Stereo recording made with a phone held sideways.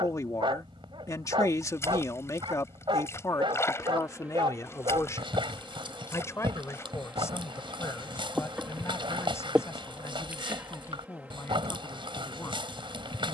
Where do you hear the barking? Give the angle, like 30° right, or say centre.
30° right.